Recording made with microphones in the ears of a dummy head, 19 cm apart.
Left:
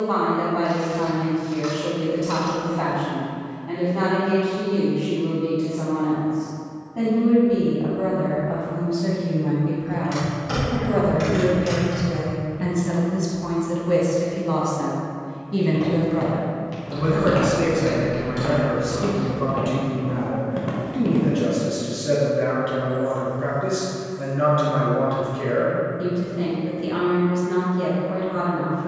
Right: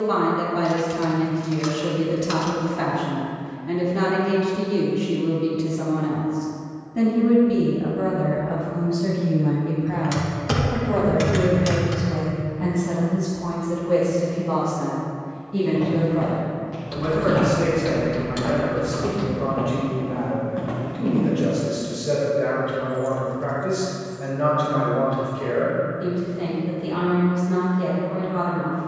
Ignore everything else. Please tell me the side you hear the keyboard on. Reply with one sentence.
You can hear the keyboard on the right.